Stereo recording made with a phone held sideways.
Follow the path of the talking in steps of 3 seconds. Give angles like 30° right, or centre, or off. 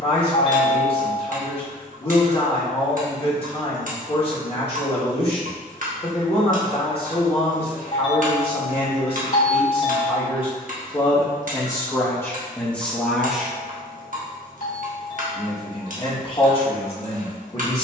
40° left, 40° left, 40° left, 30° left, 10° left, 30° left.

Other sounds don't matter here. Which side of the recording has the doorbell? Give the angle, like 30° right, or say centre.
70° left.